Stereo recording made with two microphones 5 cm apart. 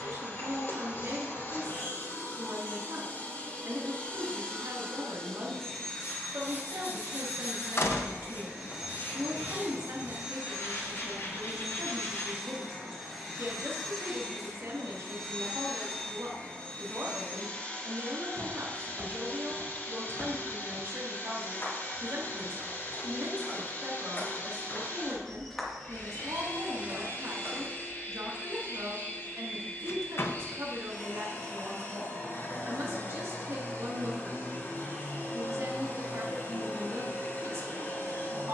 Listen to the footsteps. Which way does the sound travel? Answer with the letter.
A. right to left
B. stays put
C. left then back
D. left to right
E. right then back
C.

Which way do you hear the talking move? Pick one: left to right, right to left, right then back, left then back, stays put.
stays put.